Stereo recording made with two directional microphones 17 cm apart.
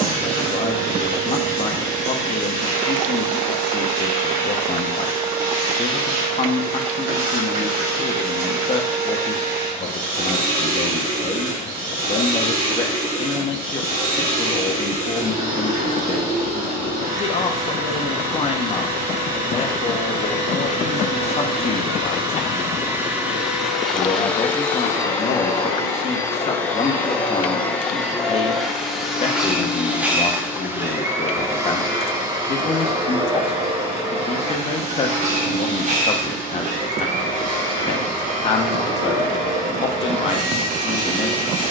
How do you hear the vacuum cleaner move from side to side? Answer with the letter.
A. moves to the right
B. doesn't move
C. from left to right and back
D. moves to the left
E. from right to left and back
E.